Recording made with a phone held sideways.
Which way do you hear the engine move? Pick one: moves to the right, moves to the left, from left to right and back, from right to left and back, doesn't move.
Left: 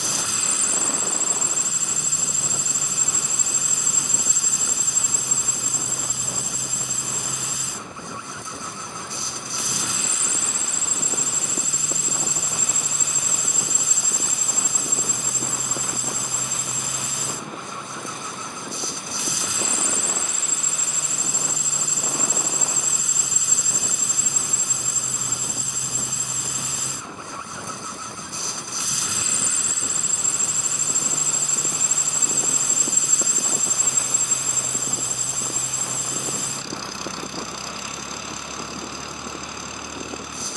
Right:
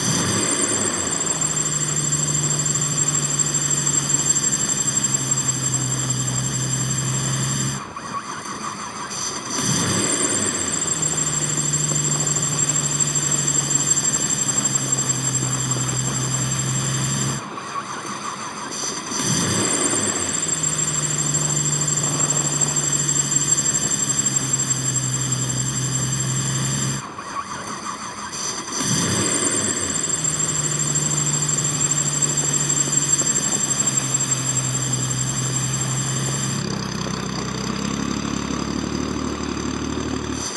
doesn't move.